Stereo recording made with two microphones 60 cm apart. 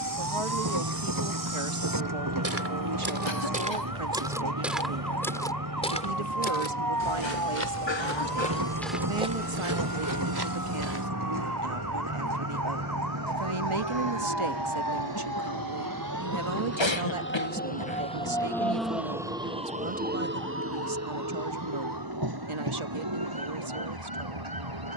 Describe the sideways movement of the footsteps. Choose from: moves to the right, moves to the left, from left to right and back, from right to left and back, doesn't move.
from right to left and back.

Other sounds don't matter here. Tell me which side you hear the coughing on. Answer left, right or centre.
left.